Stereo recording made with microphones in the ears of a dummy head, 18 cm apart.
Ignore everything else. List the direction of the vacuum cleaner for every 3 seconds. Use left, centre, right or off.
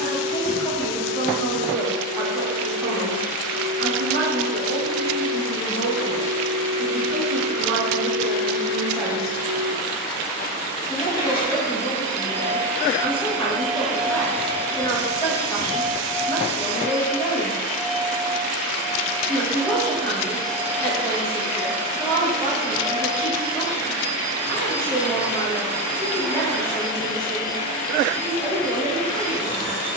left, left, left, left, centre, left, left, left, left, left.